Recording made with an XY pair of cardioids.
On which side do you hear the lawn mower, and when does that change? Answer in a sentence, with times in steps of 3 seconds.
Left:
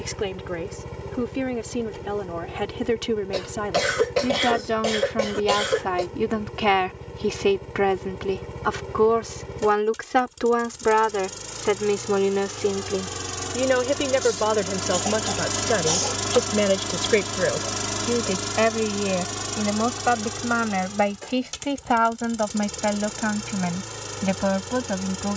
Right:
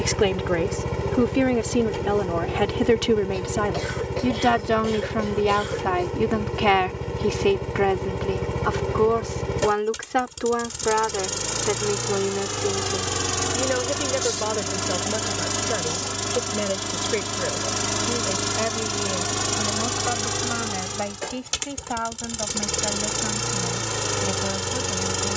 You can hear the lawn mower on the right from 0 s, in the centre from 15 s and on the right from 18 s.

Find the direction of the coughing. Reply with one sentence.
You can hear the coughing on the left.